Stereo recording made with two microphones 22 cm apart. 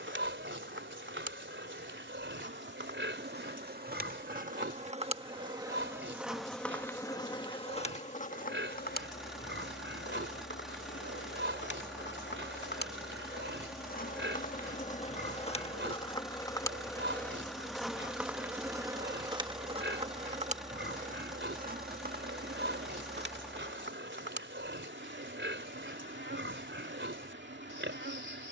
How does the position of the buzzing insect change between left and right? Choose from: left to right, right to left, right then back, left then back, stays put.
left then back.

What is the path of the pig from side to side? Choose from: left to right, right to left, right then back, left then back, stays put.
stays put.